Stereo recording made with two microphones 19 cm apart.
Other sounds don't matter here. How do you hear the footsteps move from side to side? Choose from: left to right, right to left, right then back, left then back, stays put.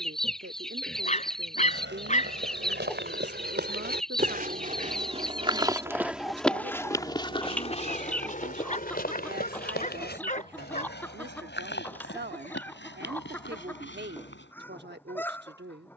right to left.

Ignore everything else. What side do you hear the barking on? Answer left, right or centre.
left.